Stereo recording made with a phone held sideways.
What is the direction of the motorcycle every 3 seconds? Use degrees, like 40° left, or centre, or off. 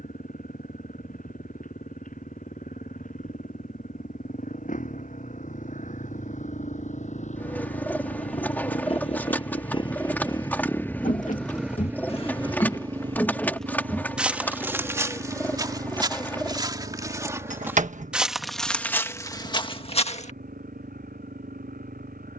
80° left, 70° left, 60° left, 20° left, 40° right, 70° right, 70° right, 80° right.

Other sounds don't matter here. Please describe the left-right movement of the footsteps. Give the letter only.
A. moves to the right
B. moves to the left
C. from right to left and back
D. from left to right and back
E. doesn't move
D.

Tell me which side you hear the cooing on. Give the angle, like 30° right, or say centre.
10° left.